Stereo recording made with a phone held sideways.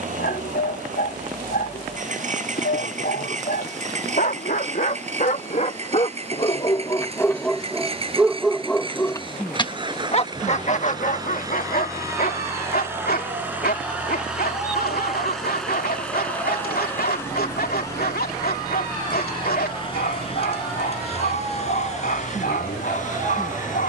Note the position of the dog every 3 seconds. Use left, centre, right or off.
left, left, centre, left, left, left, left, left.